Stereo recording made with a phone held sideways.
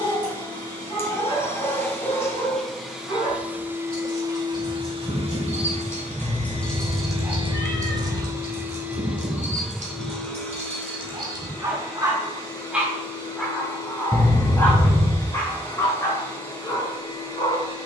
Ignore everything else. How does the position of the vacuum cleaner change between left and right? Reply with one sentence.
In this clip you hear the vacuum cleaner go right and come back.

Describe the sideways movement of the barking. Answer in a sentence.
You can hear the barking go right and come back.